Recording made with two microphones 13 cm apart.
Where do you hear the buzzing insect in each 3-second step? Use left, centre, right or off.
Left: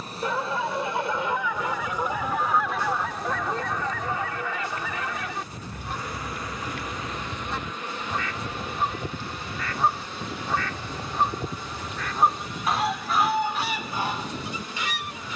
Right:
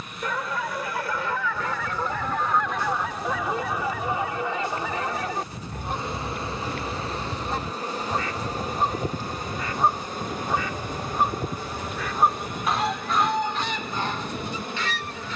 left, centre, right, right, right.